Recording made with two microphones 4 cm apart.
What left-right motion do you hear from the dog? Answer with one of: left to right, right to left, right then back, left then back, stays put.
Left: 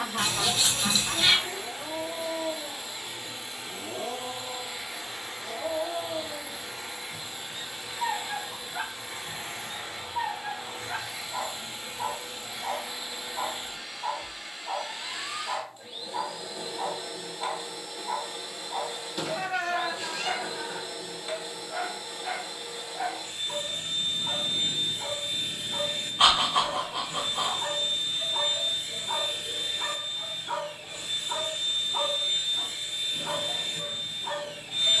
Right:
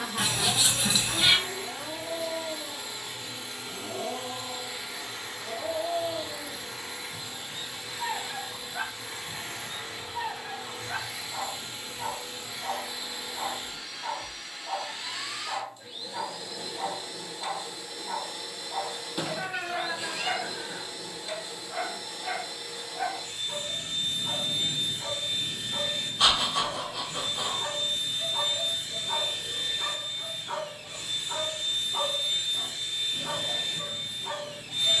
stays put.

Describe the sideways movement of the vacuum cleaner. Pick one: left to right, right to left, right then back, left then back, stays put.
stays put.